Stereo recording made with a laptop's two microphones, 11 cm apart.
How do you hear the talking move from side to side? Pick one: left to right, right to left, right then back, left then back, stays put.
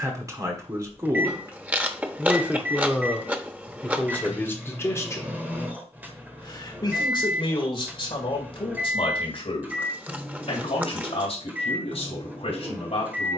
right to left.